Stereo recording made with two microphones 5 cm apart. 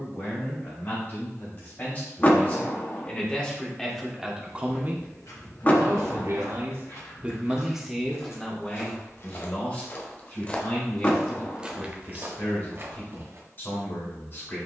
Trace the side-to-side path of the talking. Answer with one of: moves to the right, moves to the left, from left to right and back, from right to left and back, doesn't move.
from left to right and back.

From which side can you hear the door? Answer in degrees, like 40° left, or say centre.
30° left.